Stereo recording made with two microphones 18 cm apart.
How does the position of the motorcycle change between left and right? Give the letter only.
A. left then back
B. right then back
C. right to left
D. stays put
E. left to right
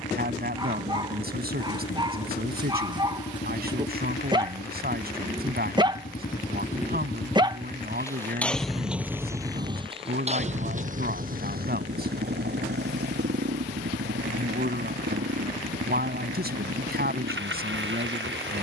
E.